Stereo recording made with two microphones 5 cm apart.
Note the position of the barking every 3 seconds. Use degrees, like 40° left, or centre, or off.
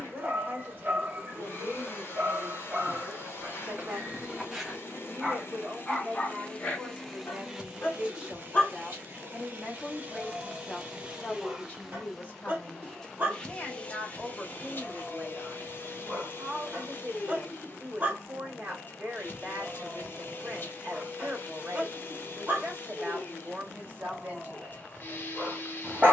40° right, 10° right, 30° left, 20° right, 30° right, 30° right, 30° right, 30° right, 30° right.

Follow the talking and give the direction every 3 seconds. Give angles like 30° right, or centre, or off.
40° right, 40° right, 20° right, 10° left, 30° left, 30° right, 40° right, 40° right, 40° right.